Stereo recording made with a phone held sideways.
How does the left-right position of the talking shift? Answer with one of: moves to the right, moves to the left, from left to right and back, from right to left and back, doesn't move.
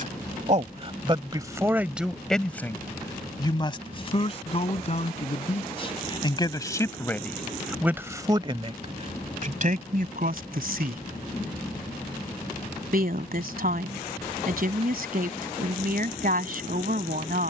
from right to left and back.